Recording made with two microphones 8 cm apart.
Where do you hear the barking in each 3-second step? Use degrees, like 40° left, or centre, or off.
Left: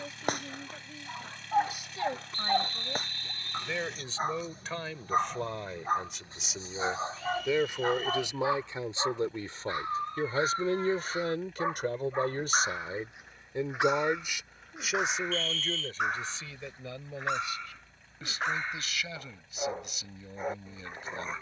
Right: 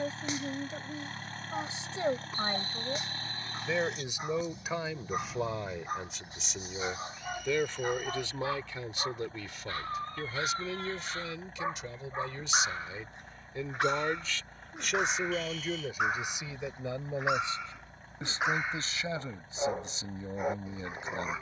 50° left, 40° left, 30° left, 20° left, 10° left, centre, 10° right.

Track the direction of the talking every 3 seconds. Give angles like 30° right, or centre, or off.
30° right, 10° right, 10° left, 40° left, 30° left, 10° right, 30° right.